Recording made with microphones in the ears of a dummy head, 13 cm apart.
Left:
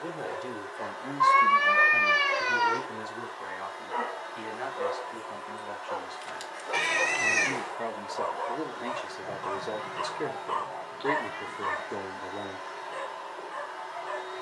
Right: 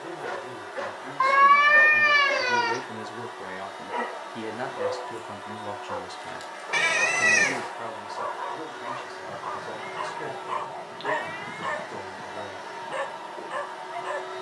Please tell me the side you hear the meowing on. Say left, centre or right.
right.